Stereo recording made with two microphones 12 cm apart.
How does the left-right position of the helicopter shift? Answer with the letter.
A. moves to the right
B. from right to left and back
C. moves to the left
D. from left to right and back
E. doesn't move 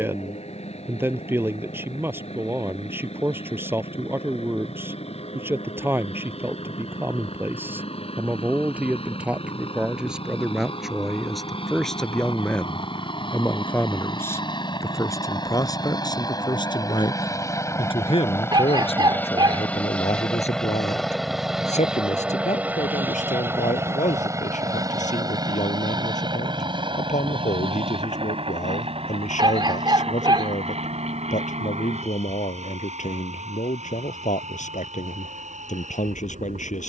A.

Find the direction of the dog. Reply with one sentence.
In this clip you hear the dog on the right.